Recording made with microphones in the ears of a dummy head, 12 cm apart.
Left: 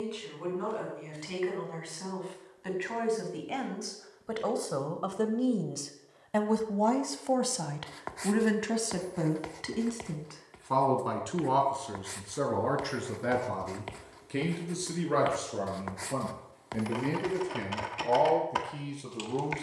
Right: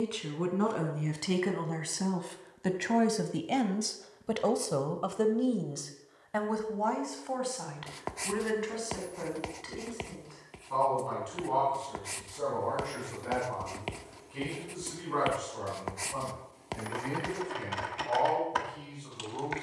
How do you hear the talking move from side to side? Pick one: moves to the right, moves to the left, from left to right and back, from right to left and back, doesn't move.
moves to the left.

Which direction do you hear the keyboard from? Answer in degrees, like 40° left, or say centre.
10° left.